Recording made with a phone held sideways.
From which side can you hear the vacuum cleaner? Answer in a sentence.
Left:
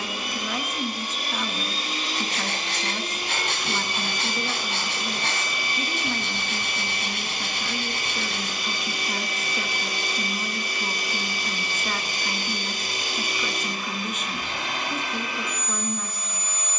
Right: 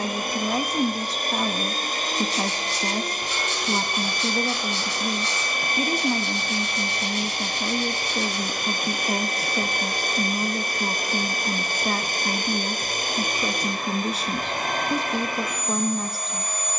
In this clip you hear the vacuum cleaner on the right.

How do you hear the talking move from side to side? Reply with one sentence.
In this clip you hear the talking stay put.